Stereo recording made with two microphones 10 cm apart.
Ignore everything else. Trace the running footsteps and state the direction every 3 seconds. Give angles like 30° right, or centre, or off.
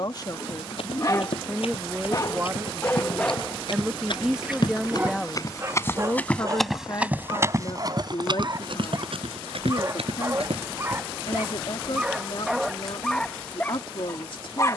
70° left, 50° left, 30° right, 70° right, off.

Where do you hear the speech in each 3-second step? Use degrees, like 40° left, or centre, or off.
centre, centre, 40° left, 50° left, 50° left.